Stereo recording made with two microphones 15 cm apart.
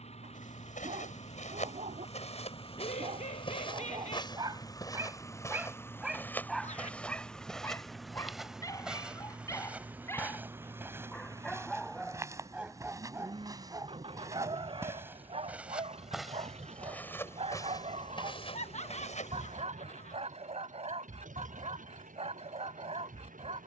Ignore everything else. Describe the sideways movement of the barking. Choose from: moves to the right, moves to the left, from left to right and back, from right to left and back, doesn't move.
from right to left and back.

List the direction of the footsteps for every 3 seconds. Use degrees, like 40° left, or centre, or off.
50° left, 30° left, centre, 10° right, 20° right, centre, 40° left, off.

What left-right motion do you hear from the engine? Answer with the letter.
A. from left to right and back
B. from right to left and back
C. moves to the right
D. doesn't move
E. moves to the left
C.